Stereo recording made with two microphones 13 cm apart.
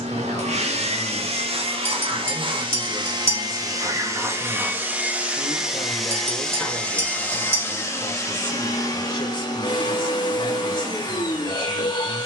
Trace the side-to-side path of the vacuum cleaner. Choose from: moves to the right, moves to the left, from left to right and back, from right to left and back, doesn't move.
moves to the left.